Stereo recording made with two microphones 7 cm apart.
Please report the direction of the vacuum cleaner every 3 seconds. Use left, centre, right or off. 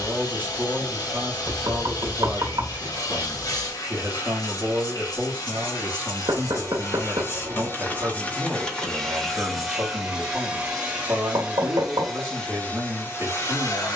left, left, left, centre, left.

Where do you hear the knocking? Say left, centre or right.
right.